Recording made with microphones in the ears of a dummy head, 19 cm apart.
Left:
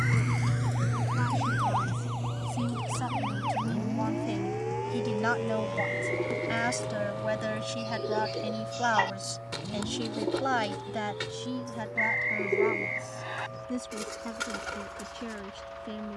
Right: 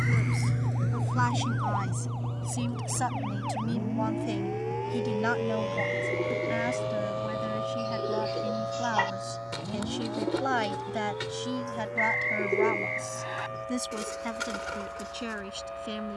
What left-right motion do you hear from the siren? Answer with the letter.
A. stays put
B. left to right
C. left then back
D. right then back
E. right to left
B.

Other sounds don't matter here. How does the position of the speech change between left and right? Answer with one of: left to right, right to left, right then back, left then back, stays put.
left then back.